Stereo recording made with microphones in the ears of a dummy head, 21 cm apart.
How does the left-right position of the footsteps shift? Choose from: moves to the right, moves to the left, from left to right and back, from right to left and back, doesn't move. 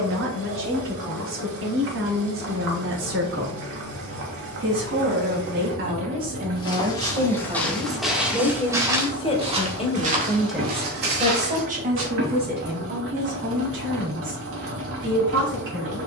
moves to the right.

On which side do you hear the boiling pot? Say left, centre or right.
right.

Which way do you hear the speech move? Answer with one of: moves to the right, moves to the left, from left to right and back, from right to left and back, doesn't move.
from right to left and back.